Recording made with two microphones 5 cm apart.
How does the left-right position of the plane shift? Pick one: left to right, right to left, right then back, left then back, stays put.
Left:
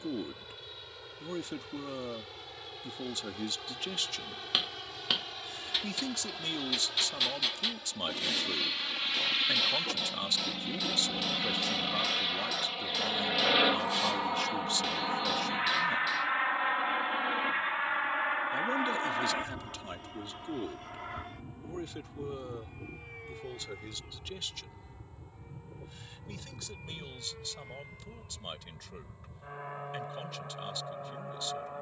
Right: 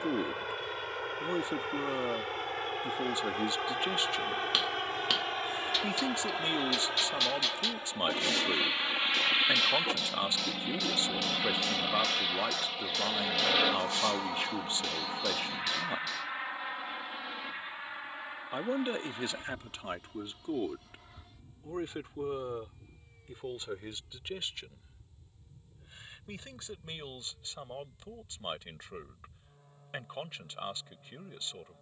right to left.